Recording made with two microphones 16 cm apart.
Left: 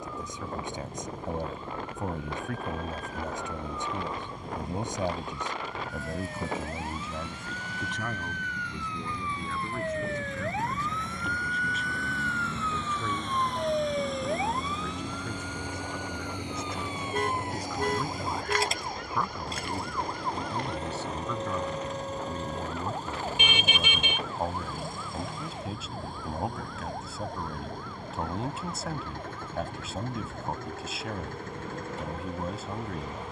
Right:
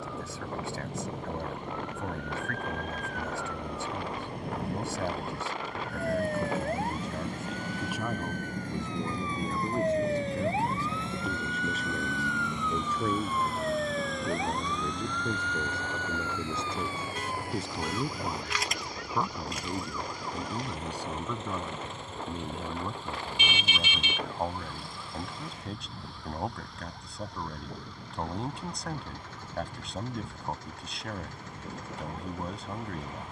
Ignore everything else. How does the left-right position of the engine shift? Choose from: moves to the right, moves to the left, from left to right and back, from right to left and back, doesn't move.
moves to the left.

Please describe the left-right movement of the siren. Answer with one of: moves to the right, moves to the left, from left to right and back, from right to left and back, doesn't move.
moves to the left.